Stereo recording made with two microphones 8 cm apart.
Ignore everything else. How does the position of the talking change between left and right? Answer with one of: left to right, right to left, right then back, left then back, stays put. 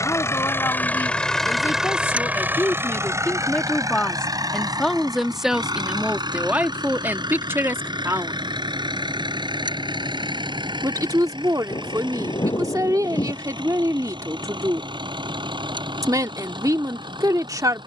left to right.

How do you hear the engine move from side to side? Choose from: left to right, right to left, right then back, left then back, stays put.
left to right.